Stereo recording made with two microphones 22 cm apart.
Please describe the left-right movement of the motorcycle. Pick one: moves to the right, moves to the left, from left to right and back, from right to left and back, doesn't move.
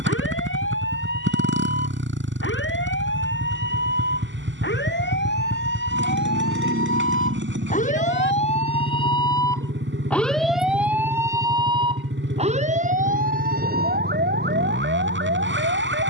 doesn't move.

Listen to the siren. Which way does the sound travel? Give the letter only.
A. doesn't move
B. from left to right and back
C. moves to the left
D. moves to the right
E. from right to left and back
D.